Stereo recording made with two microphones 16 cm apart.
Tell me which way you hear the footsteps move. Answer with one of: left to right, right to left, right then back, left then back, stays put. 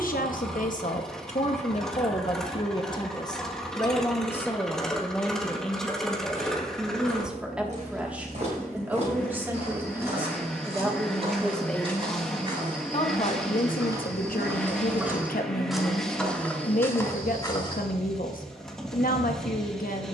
right to left.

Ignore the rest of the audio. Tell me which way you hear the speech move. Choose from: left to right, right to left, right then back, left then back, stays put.
right then back.